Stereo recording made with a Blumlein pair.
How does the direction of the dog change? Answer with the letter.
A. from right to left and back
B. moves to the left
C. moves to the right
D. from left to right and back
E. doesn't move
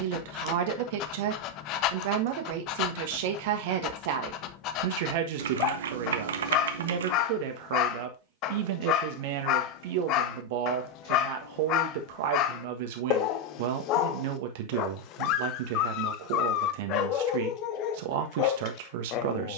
E.